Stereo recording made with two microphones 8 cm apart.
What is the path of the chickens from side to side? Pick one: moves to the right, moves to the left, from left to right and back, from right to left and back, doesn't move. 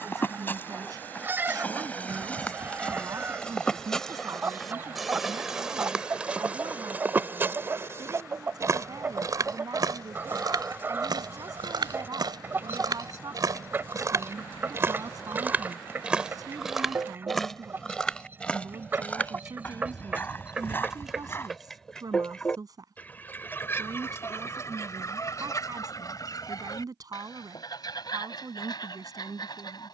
moves to the left.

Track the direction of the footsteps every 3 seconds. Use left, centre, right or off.
left, centre, right, right, right, centre, left, left, off, off.